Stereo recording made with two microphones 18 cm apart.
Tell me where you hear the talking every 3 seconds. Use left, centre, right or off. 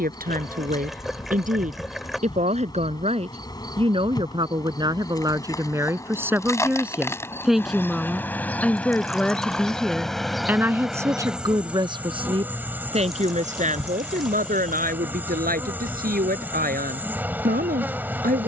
right, right, centre, centre, right, right.